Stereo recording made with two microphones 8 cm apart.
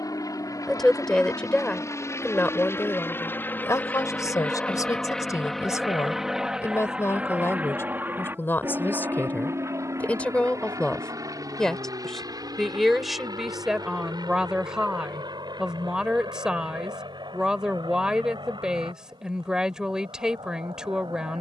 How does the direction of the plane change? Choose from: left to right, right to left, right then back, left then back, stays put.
left to right.